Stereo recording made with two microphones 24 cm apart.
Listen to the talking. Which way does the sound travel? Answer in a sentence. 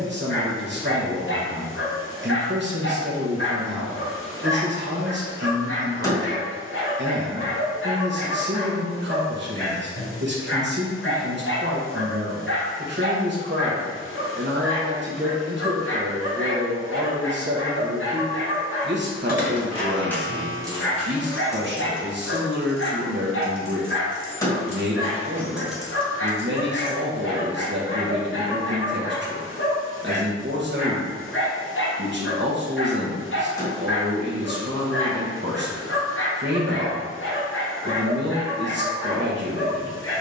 In this clip you hear the talking stay put.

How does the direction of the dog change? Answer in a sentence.
In this clip you hear the dog stay in one place.